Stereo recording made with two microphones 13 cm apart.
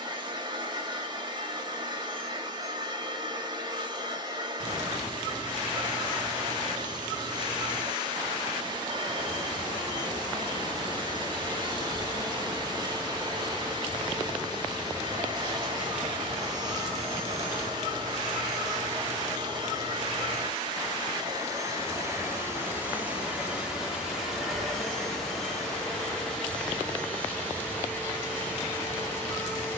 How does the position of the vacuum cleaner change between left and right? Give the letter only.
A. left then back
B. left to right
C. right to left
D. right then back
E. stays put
C.